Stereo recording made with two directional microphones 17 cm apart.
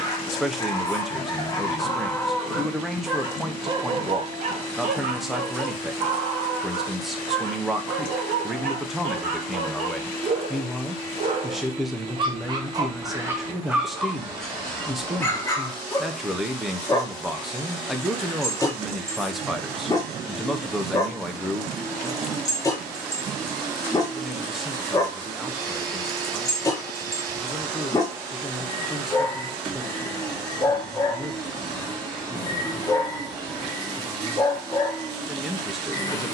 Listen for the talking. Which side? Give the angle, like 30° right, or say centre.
centre.